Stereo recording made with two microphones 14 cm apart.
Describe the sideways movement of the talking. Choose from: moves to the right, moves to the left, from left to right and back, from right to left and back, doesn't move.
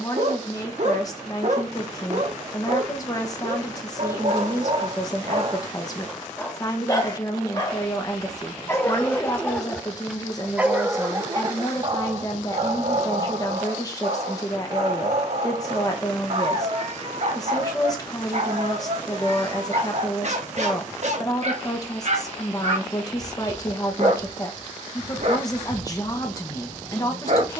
doesn't move.